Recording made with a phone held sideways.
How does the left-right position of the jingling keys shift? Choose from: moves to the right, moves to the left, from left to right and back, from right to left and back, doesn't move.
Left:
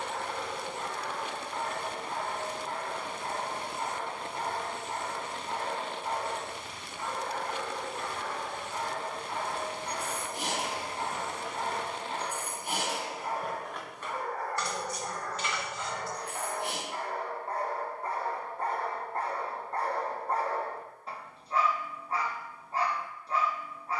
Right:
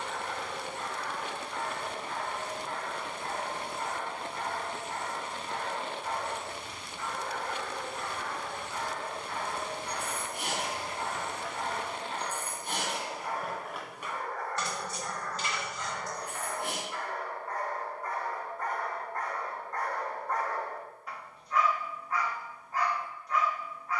moves to the right.